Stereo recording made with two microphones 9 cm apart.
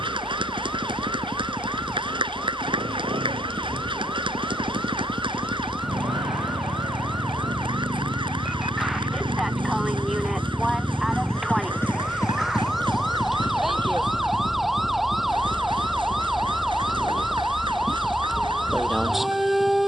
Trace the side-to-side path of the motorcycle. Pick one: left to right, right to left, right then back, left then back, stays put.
right to left.